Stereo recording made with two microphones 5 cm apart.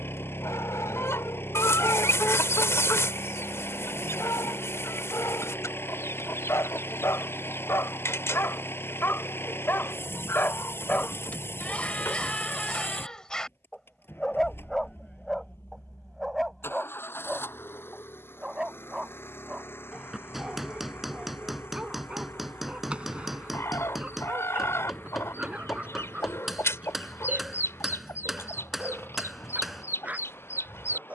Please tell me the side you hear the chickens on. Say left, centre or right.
left.